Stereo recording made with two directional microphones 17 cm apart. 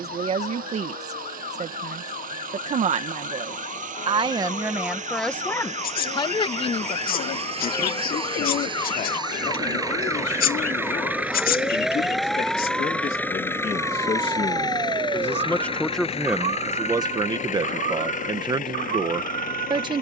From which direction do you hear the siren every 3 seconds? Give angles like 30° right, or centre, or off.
50° left, 40° left, 30° left, 10° left, 20° right, 40° right, 60° right.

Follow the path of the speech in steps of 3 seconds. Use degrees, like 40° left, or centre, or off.
40° right, 20° right, 40° left, 50° left, 40° left, 10° right, 30° right.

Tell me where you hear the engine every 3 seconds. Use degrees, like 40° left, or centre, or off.
60° right, 50° right, 40° right, 10° right, 10° left, 40° left, 50° left.